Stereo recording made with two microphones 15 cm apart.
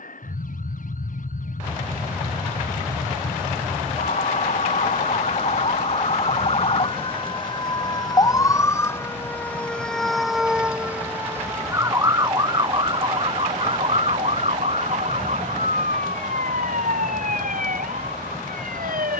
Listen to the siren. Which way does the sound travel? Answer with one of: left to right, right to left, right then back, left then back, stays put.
left to right.